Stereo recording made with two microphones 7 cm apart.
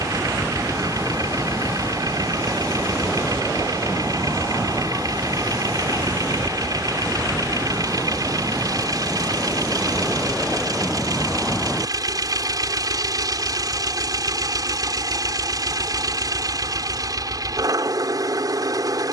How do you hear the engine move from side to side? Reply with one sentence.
You can hear the engine stay put.